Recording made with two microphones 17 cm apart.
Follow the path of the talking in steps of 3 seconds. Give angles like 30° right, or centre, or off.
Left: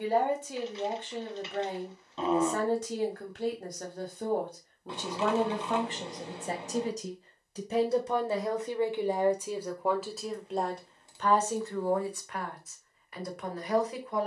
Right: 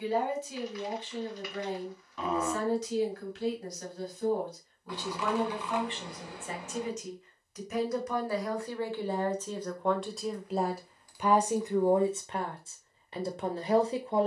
50° left, 50° left, 30° left, centre, 30° right.